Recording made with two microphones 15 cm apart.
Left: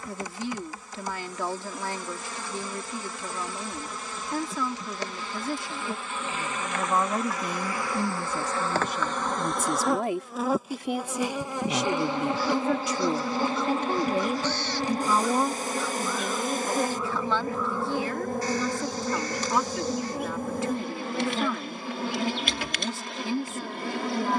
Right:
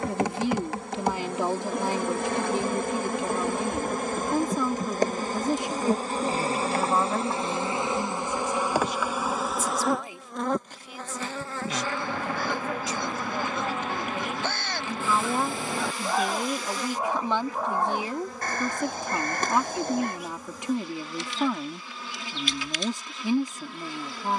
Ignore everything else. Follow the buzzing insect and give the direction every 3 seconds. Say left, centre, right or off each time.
right, right, right, centre, left, left, left, left.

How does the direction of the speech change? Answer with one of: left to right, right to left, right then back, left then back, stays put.
left then back.